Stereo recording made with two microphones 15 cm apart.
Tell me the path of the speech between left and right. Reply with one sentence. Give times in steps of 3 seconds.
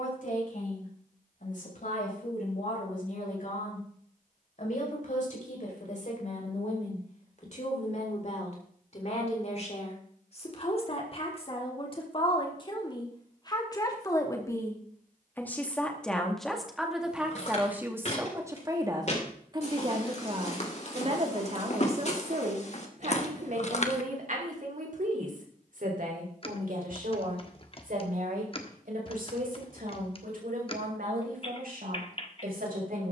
You can hear the speech on the left from 0 s, in the centre from 15 s and on the right from 18 s.